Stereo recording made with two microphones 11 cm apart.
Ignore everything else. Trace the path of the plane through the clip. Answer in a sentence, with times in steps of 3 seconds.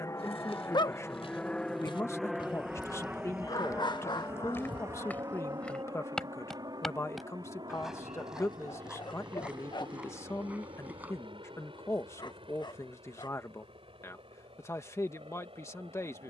In this clip you hear the plane in the centre from 0 s and on the right from 3 s.